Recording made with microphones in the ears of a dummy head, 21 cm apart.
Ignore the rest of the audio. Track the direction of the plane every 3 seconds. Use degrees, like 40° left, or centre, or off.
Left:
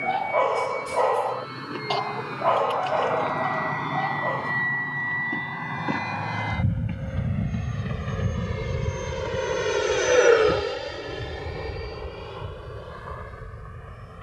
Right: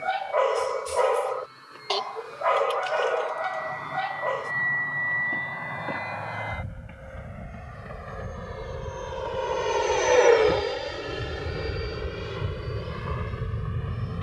70° left, 60° left, 50° left, 10° left, 30° right.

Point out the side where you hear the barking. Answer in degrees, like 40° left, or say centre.
20° right.